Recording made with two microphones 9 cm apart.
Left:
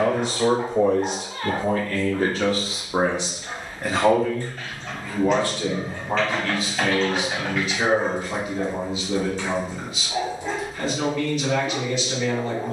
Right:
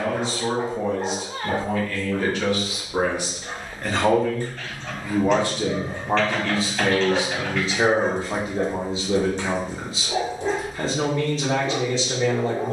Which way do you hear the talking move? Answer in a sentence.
You can hear the talking move to the right.